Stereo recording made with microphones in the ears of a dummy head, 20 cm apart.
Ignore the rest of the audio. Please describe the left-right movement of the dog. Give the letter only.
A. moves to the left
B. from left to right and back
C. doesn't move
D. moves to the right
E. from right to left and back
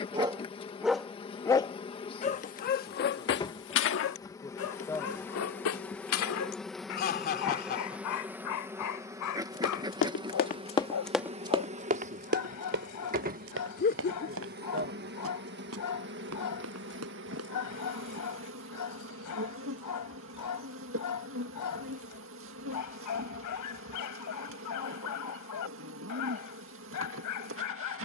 A.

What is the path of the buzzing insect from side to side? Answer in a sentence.
In this clip you hear the buzzing insect move to the right.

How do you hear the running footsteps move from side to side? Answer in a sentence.
In this clip you hear the running footsteps go from the left side to the right.